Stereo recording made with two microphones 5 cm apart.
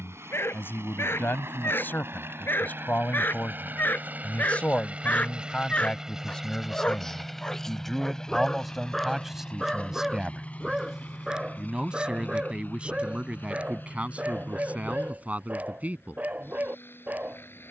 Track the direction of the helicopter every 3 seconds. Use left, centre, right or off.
right, right, centre, left, left, left.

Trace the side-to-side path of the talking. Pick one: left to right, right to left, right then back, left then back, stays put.
left to right.